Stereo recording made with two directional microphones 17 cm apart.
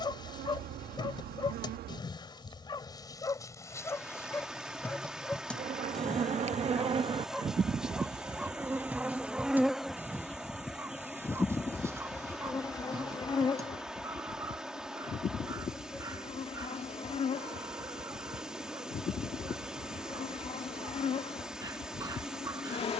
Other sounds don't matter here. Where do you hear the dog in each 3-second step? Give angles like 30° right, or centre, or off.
30° left, 10° left, centre, 10° right, 20° right, 20° right, 20° right, 20° right.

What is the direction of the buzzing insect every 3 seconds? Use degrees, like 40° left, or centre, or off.
70° right, 50° right, 30° right, centre, 30° left, 40° left, 40° left, 40° left.